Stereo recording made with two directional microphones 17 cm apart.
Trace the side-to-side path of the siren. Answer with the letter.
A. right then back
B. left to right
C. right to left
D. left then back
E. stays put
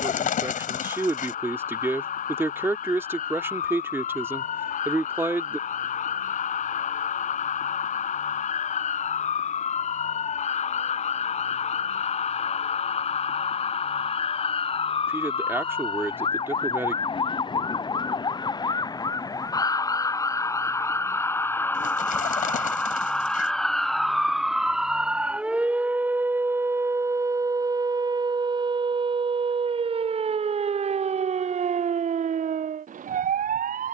B.